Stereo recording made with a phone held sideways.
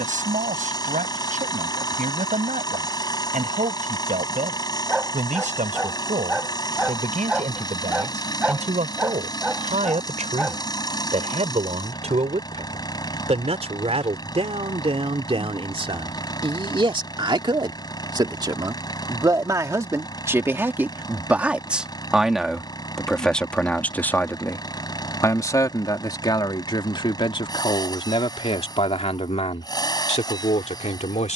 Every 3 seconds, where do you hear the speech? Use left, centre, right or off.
right, right, right, right, right, right, right, centre, left, left, left.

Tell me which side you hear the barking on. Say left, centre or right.
centre.